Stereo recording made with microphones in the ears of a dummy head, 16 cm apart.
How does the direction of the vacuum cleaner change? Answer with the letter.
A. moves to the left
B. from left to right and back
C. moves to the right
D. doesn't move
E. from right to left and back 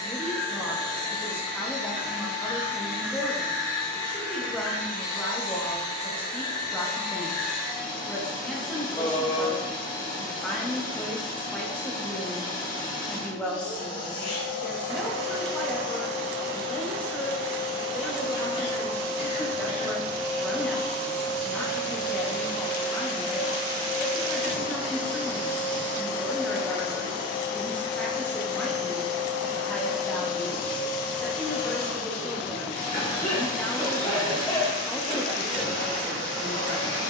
D.